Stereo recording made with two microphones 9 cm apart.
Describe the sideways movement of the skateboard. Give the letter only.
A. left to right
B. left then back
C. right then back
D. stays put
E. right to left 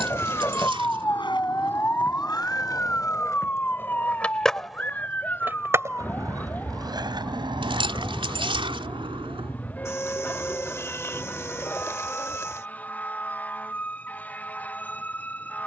A.